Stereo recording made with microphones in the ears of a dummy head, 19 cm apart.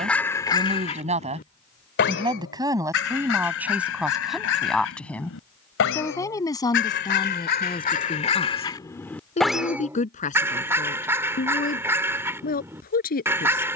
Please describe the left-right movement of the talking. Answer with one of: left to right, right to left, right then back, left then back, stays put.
right to left.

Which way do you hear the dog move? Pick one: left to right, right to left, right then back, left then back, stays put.
left then back.